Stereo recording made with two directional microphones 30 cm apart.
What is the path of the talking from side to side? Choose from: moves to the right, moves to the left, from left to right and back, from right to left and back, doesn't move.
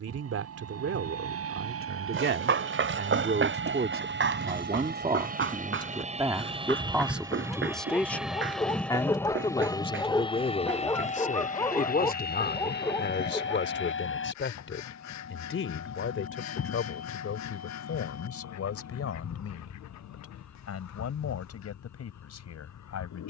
moves to the left.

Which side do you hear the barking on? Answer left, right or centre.
centre.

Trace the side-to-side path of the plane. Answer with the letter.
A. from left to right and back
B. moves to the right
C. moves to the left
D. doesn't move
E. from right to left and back
C.